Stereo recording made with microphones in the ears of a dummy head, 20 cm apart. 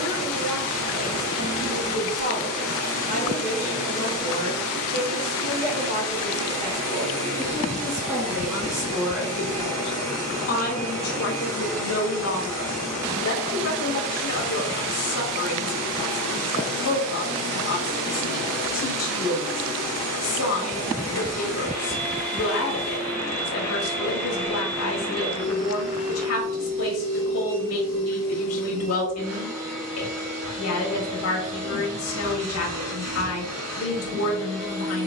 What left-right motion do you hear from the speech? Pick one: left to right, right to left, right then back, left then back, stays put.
right to left.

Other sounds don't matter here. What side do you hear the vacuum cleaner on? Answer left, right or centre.
right.